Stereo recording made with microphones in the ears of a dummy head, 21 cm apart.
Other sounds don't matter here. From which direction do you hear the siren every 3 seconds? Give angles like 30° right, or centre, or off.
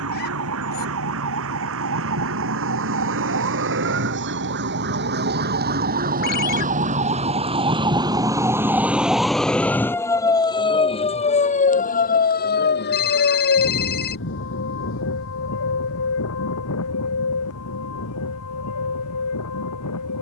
60° right, 50° right, 20° right, 20° left, 50° left, 60° left, 70° left.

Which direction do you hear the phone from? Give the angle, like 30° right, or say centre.
40° left.